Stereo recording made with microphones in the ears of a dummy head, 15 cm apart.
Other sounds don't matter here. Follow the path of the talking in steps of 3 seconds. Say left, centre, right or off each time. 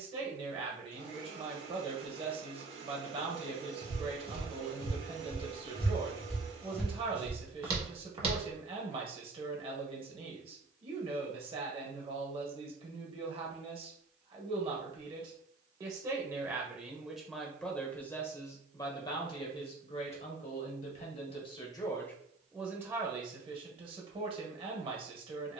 right, right, right, right, right, centre, left, centre, right.